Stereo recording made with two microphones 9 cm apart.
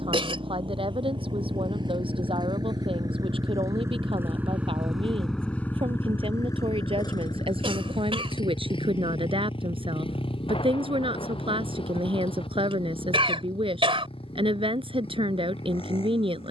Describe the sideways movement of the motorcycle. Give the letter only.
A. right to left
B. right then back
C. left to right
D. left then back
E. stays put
A.